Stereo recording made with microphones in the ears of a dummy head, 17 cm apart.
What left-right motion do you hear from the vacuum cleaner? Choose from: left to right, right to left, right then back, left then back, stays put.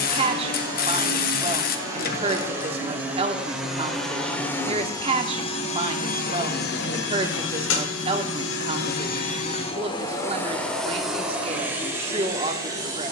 left then back.